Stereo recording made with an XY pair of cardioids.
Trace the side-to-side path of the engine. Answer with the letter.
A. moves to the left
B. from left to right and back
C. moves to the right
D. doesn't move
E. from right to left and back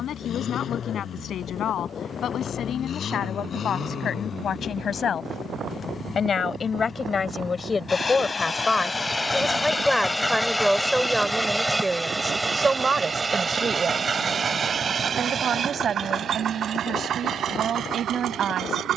C.